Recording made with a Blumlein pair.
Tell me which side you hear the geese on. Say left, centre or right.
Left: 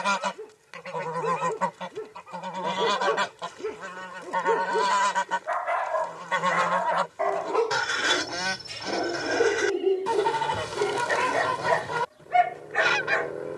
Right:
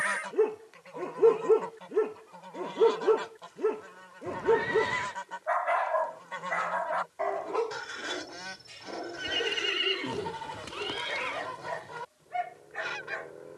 left.